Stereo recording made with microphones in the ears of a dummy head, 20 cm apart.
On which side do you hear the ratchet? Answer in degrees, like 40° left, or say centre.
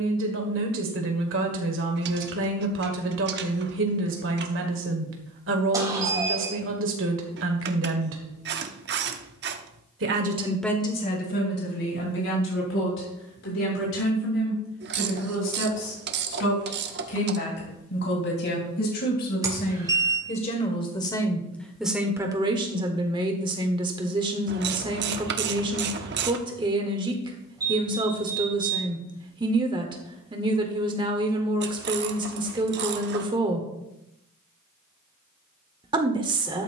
50° right.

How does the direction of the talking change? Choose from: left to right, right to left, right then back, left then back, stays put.
left then back.